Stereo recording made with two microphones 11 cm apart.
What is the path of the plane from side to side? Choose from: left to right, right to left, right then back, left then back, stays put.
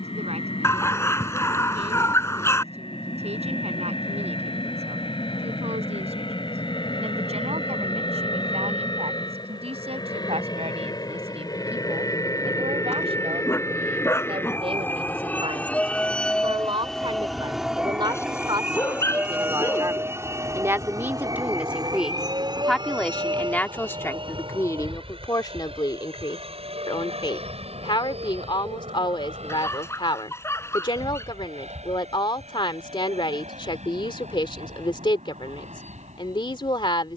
left to right.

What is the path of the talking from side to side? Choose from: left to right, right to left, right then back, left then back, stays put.
right to left.